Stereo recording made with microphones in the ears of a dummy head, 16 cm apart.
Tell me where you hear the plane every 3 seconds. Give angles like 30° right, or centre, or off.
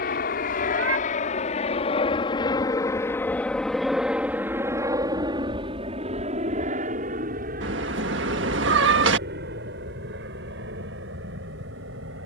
40° left, 10° right, 40° right, 60° right.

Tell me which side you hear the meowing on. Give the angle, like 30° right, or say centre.
70° right.